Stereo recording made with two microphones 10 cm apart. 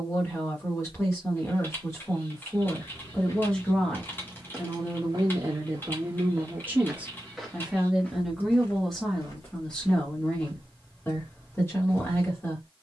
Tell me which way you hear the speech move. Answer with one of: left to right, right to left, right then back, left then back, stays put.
right then back.